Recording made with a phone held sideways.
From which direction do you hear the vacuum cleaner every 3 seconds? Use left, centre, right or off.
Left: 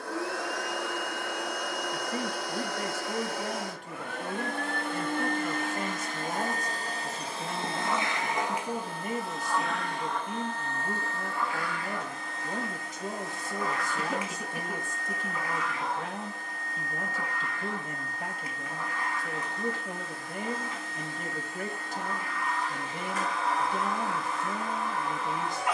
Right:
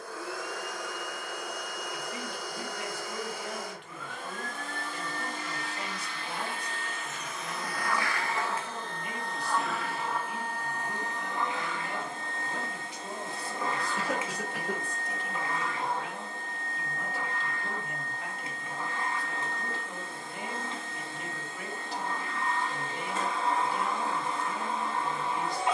left, left, left, centre, right, right, right, right, right.